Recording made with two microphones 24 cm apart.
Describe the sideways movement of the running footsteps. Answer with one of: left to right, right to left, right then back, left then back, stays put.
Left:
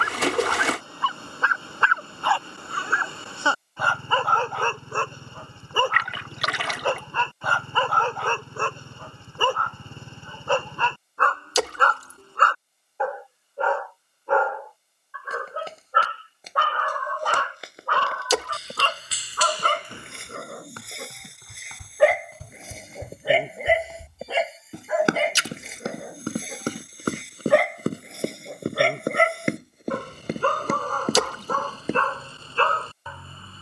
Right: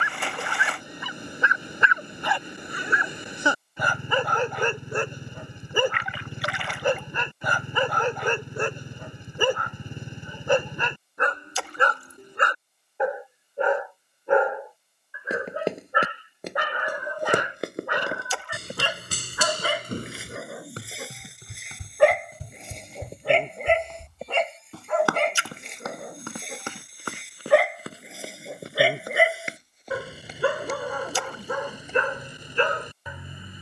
right to left.